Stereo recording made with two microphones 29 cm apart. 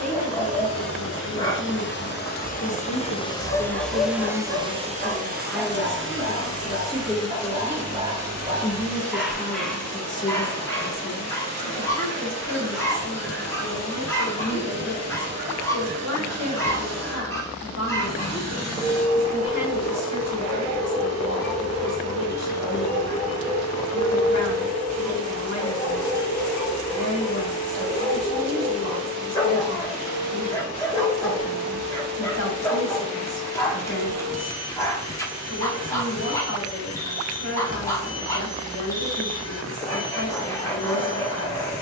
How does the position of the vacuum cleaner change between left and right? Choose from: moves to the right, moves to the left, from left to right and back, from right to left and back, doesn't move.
moves to the right.